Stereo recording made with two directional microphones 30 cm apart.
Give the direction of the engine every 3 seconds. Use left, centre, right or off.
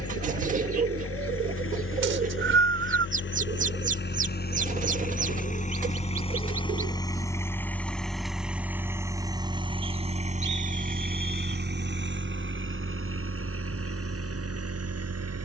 left, left, centre, right, right.